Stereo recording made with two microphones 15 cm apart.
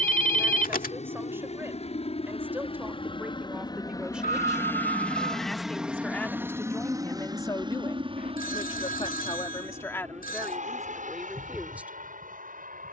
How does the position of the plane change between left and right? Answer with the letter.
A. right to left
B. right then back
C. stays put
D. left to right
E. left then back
D.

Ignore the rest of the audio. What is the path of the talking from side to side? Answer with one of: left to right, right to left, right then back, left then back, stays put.
left then back.